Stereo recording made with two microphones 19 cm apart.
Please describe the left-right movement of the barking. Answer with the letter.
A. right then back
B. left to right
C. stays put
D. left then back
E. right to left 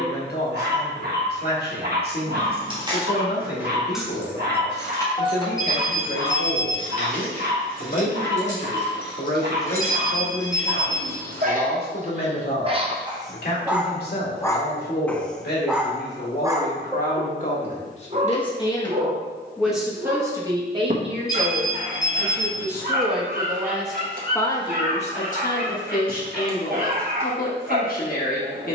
D.